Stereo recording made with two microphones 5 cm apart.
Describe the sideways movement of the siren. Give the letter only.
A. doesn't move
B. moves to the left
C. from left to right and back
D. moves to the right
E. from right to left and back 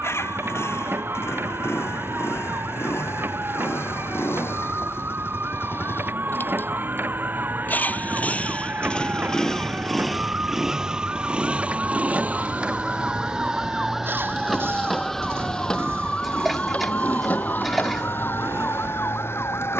B.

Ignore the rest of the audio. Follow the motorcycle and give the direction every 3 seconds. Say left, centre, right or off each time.
left, left, left, centre, right, right, right.